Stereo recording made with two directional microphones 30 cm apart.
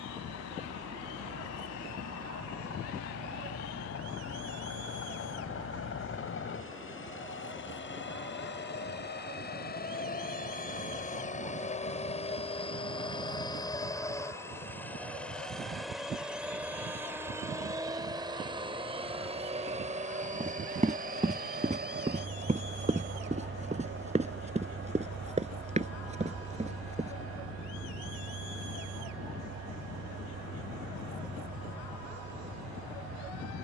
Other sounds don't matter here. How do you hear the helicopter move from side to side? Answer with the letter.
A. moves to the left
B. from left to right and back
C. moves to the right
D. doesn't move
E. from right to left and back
C.